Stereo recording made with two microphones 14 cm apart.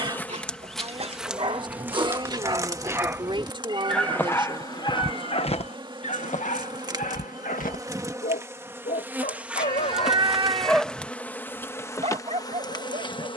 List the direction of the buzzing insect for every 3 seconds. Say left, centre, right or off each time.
centre, right, right, centre, left.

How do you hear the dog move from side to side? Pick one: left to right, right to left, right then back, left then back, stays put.
left then back.